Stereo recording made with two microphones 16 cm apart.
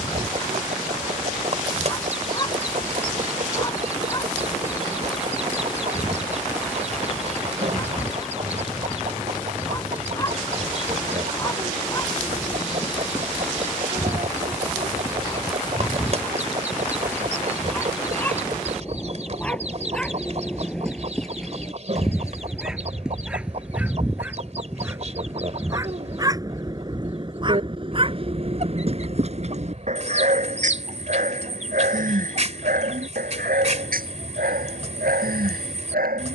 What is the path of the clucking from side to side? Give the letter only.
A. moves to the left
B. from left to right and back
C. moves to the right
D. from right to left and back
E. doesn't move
E.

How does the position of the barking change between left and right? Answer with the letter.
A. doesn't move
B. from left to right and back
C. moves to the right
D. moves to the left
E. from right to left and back
C.